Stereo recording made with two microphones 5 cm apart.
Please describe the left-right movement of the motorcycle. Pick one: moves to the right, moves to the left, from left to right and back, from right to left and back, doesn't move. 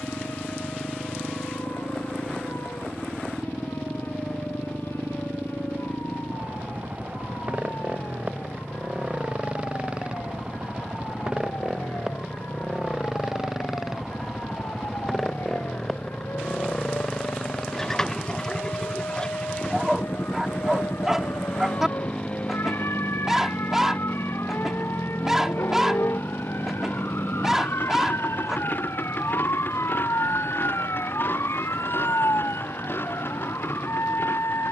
moves to the left.